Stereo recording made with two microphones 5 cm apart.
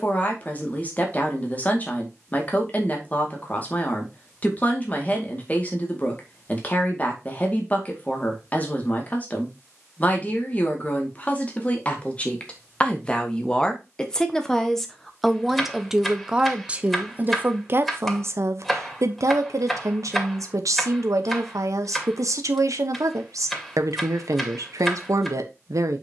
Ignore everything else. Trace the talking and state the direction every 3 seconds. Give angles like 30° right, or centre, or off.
30° left, 30° left, 30° left, 30° left, 20° left, 20° right, 70° right, 80° right, 80° right.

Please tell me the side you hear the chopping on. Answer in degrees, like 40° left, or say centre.
centre.